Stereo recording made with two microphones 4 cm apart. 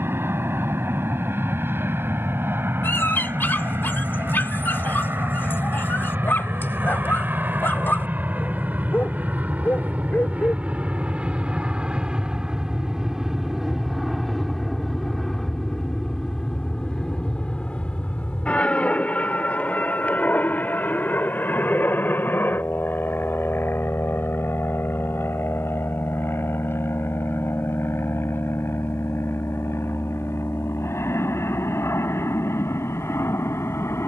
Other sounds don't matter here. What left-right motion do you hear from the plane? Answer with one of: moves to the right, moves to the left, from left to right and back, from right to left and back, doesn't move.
moves to the left.